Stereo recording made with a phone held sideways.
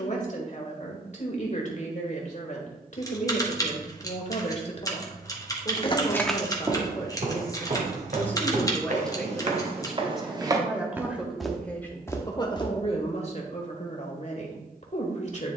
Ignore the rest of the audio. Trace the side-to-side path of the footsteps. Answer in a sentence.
You can hear the footsteps go right and come back.